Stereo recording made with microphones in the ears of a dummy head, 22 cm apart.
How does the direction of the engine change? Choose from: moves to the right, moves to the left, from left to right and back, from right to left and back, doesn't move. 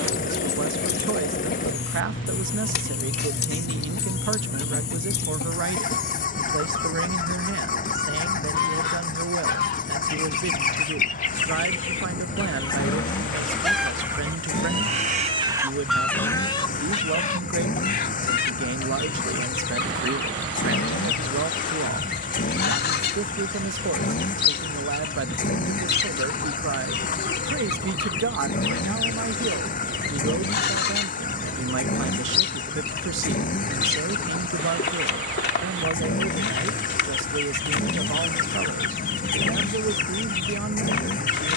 doesn't move.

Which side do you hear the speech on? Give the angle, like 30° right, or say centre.
50° right.